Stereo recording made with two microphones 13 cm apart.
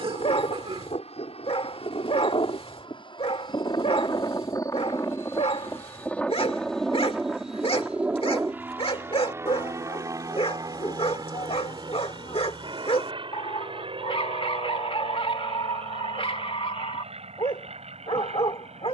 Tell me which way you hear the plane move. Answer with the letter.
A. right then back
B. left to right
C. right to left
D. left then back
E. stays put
B.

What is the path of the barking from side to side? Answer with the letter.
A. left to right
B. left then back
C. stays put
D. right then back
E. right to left
C.